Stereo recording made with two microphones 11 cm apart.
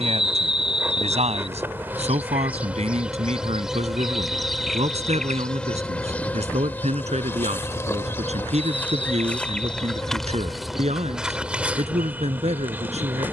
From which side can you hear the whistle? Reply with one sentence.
You can hear the whistle on the left.